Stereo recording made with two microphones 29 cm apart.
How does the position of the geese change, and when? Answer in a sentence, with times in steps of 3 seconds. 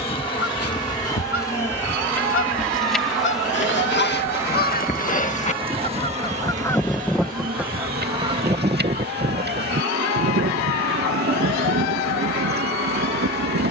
You can hear the geese on the left from 0 s, in the centre from 6 s and on the right from 9 s.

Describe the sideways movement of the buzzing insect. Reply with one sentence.
You can hear the buzzing insect travel towards the right.